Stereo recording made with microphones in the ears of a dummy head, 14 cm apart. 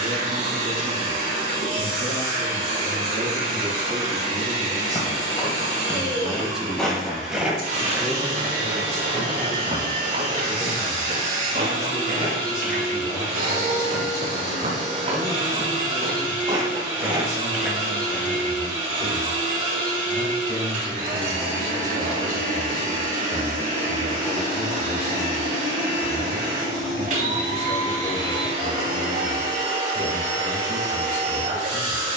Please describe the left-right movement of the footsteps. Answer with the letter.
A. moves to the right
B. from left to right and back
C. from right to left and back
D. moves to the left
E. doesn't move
B.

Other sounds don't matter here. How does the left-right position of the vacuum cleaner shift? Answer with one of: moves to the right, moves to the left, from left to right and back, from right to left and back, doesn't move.
doesn't move.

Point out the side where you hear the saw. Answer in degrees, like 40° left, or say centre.
30° right.